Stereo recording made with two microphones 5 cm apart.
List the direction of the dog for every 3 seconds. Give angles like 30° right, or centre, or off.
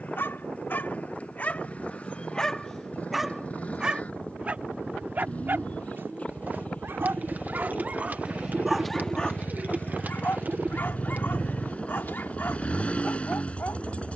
30° left, 30° right, 30° right, 40° left, 50° left.